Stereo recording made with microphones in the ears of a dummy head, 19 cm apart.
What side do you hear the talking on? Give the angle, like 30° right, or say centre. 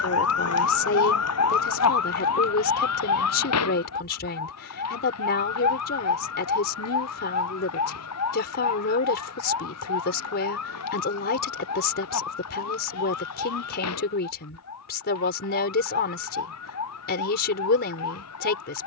50° left.